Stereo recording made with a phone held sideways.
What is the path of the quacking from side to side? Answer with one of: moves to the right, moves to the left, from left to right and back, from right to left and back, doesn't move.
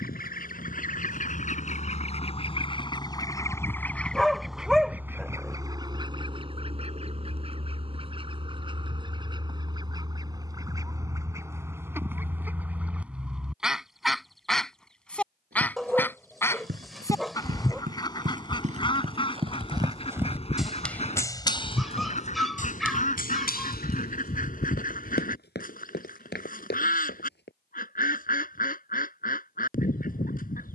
from left to right and back.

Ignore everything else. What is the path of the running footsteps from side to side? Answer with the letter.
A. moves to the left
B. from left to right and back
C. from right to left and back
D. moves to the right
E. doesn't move
A.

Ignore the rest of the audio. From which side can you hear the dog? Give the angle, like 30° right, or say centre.
centre.